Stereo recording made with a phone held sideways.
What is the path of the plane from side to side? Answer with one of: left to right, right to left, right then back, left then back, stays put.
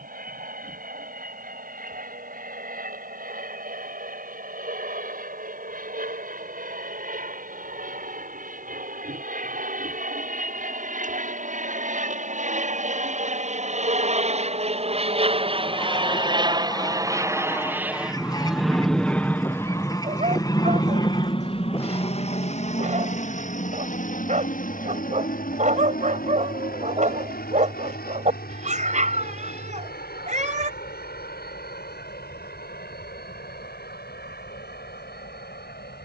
right to left.